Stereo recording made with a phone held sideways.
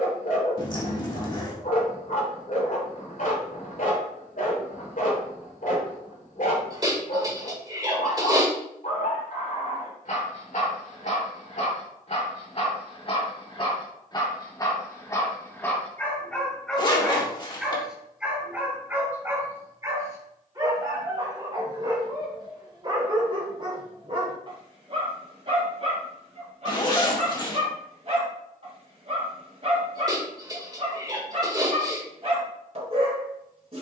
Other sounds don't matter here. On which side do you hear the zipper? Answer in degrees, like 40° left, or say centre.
30° left.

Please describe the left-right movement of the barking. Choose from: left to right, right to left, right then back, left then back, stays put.
left to right.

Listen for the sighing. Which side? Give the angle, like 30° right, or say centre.
30° right.